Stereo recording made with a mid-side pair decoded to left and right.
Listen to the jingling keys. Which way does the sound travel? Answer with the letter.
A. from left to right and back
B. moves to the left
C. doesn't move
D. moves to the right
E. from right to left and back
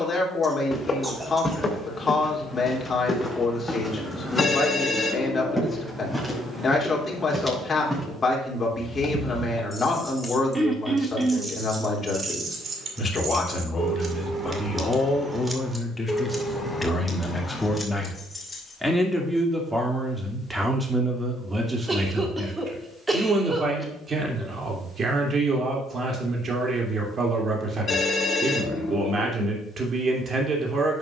A.